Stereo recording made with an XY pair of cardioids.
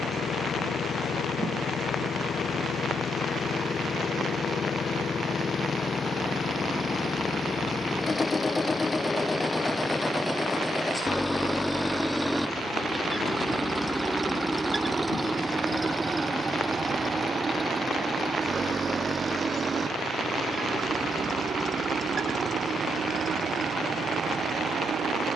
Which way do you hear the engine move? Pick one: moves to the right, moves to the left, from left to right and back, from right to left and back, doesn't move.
moves to the right.